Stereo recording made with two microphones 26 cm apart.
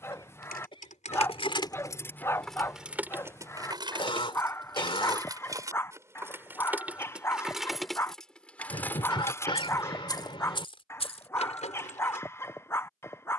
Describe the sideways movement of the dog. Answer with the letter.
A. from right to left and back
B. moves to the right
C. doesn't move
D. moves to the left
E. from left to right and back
C.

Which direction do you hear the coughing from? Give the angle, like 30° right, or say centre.
20° left.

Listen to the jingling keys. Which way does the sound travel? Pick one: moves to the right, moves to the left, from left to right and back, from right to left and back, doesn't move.
from left to right and back.